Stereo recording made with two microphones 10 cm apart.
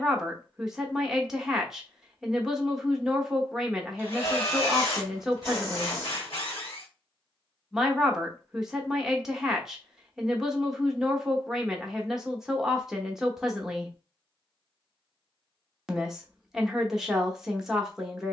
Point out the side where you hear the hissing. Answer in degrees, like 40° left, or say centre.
40° left.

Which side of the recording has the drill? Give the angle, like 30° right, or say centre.
70° left.